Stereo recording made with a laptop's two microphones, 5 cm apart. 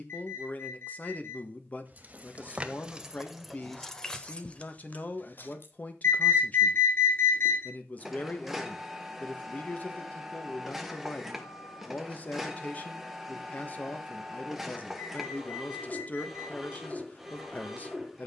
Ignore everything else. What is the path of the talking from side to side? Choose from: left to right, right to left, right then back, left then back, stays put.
stays put.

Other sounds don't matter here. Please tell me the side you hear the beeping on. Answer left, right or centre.
left.